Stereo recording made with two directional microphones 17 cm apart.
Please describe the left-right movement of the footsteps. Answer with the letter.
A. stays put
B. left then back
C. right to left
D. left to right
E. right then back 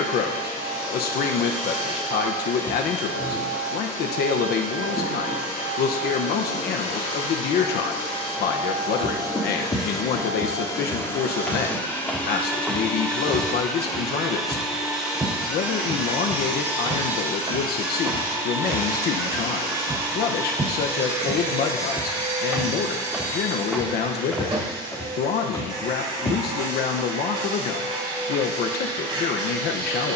E.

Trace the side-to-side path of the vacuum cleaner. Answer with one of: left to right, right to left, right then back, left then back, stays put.
left to right.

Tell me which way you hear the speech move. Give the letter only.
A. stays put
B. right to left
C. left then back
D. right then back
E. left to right
A.